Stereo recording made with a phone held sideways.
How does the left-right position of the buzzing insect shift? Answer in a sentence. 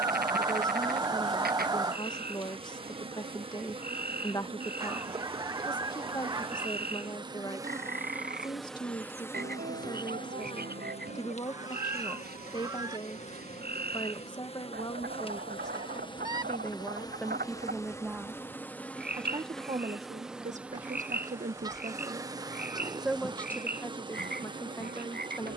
In this clip you hear the buzzing insect move from right to left and back again.